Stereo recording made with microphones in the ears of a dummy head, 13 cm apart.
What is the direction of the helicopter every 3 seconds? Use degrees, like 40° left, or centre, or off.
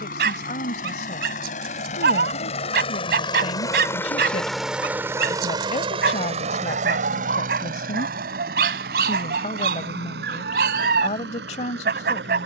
50° left, centre, 50° right, 70° right.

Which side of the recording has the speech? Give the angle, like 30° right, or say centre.
50° left.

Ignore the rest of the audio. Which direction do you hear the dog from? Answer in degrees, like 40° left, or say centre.
70° right.